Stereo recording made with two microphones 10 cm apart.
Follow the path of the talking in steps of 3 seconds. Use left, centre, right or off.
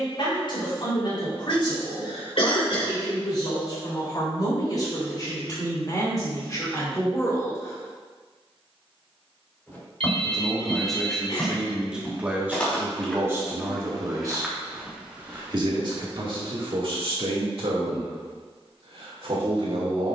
left, left, left, centre, right, right, right.